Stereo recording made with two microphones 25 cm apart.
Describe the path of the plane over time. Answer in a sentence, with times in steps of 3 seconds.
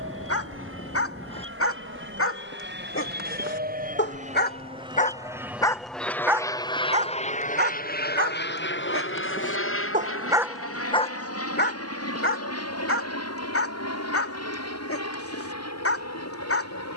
You can hear the plane on the right from 0 s and on the left from 6 s.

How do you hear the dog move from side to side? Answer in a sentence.
You can hear the dog go right and come back.